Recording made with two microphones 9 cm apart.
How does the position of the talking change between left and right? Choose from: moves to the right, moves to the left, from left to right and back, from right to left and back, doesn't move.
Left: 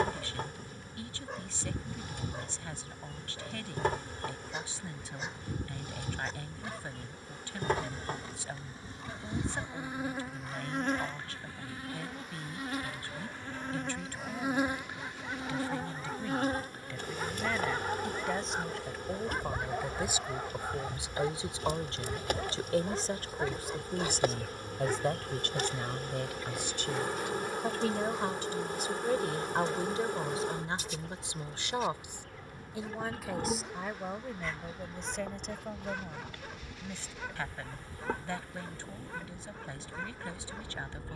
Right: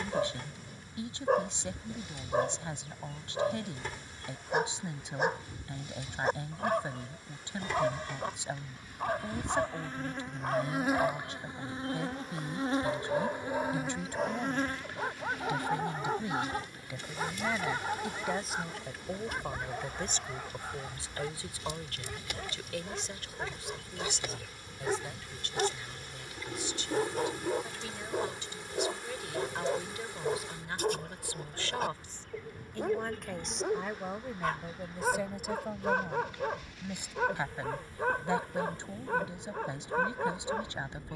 from right to left and back.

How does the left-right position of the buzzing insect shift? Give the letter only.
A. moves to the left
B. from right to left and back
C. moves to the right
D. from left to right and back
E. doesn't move
D.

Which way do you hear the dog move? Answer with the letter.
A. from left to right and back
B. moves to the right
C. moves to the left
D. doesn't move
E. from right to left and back
E.